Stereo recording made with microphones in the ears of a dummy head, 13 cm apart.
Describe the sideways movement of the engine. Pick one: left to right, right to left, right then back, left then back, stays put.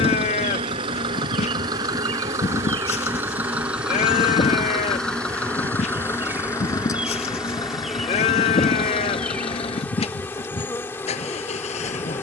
right to left.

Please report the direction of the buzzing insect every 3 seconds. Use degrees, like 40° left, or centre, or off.
50° right, 30° right, centre, 10° left.